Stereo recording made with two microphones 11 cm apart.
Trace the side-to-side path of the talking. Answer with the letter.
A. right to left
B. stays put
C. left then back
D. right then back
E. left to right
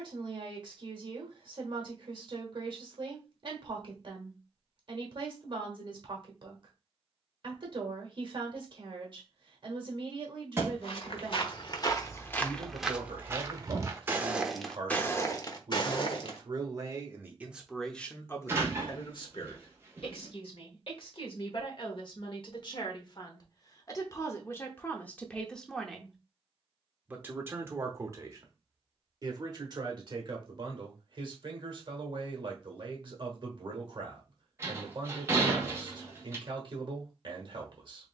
C.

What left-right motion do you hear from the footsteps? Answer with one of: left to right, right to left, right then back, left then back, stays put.
right then back.